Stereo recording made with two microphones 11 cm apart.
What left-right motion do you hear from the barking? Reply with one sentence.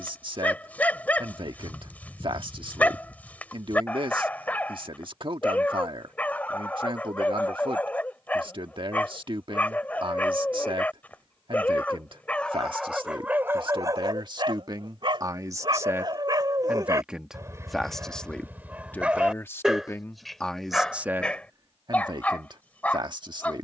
In this clip you hear the barking go right and come back.